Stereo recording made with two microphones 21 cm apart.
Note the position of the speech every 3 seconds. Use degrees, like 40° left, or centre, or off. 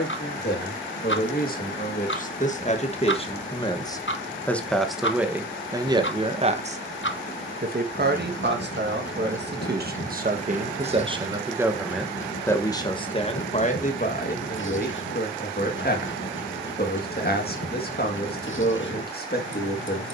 40° left, 10° left, 40° right, 30° right, 30° left, 50° left, 50° left.